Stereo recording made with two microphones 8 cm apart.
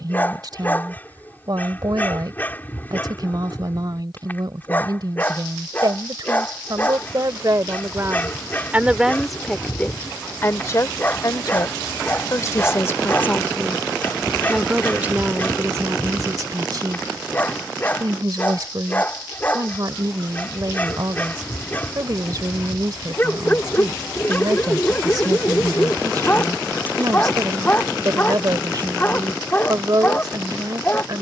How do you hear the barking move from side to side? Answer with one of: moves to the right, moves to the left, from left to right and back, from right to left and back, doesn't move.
doesn't move.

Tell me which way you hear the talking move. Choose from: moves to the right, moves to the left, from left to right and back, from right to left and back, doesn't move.
from right to left and back.